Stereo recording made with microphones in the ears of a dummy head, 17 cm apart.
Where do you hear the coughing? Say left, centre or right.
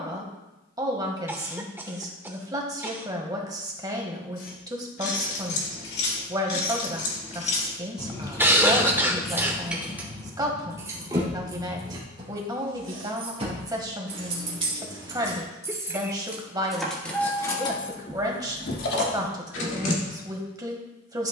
centre.